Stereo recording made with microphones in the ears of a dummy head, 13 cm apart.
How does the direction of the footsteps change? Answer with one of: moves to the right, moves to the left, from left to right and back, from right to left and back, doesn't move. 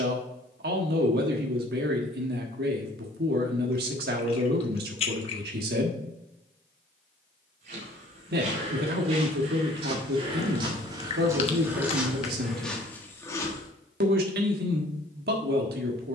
moves to the left.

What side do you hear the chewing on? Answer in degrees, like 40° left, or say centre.
40° left.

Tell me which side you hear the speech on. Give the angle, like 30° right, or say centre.
80° right.